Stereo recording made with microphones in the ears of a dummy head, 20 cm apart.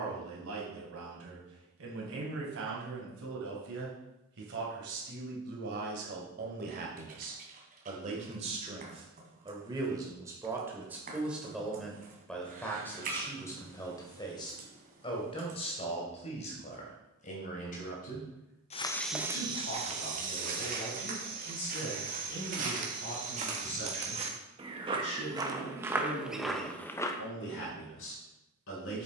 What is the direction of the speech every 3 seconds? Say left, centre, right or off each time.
right, right, right, centre, centre, left, left, left, left, left.